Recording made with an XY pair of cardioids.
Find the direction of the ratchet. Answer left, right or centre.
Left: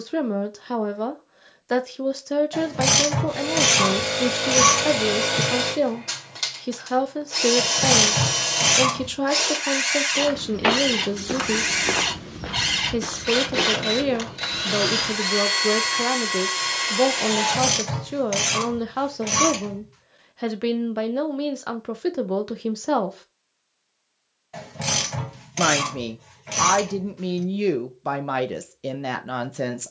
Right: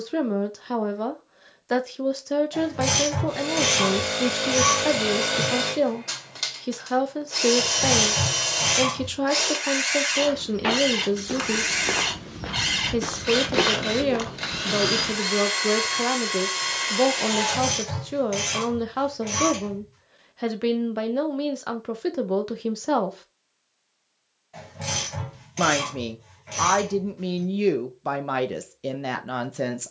left.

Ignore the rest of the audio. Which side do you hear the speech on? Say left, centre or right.
centre.